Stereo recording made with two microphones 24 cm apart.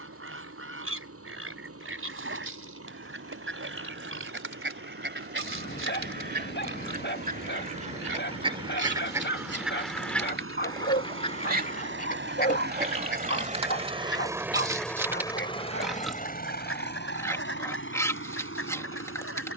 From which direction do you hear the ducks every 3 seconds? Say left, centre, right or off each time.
right, right, right, centre, left, left, left.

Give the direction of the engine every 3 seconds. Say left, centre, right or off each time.
right, right, right, right, right, left, left.